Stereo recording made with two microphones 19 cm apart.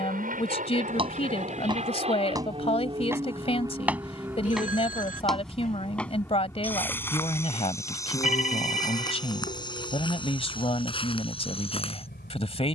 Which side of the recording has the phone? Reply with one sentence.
You can hear the phone on the left.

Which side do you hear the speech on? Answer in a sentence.
You can hear the speech on the left.